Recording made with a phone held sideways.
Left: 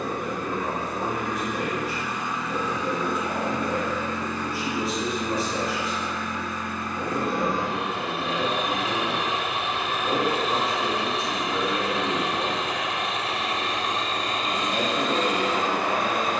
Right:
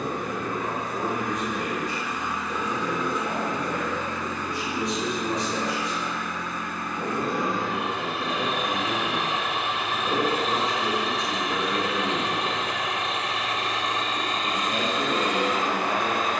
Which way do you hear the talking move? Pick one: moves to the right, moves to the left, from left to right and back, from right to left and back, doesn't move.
doesn't move.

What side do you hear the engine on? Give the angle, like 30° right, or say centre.
30° left.